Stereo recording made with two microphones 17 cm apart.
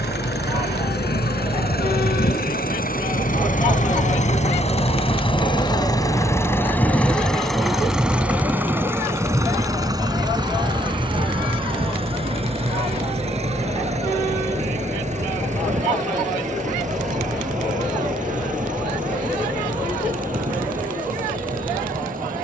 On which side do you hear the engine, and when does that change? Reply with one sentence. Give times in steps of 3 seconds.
You can hear the engine on the left from 0 s, in the centre from 6 s and on the right from 9 s.